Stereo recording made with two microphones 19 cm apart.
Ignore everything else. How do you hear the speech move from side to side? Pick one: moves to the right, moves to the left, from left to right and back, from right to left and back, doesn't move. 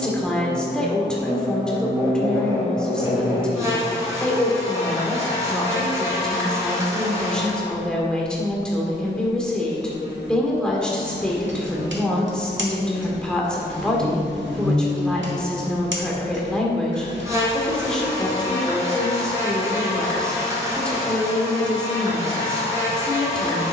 doesn't move.